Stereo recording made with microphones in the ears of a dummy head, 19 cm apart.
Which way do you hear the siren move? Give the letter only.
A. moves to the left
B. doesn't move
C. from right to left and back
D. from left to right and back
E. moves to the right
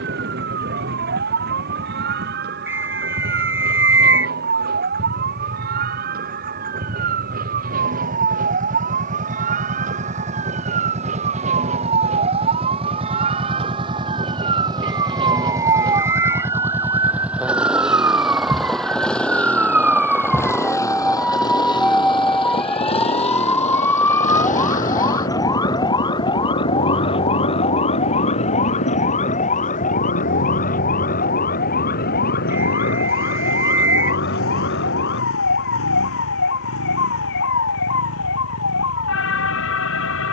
A.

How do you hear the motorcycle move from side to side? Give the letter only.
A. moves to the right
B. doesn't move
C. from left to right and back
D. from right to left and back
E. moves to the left
E.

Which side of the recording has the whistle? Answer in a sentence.
In this clip you hear the whistle in the centre.